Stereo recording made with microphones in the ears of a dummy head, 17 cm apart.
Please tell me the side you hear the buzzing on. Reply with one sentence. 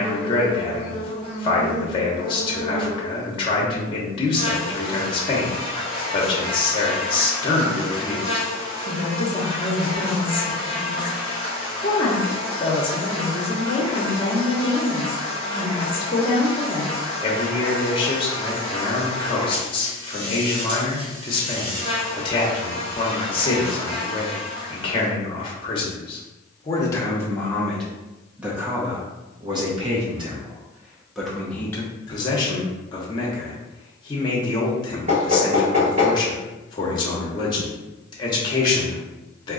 You can hear the buzzing on the right.